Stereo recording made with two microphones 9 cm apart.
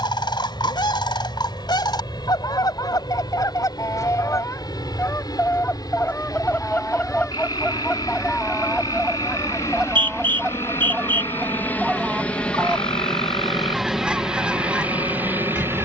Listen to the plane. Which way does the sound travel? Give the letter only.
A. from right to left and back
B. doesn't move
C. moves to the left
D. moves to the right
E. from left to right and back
D.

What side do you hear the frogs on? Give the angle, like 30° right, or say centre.
60° left.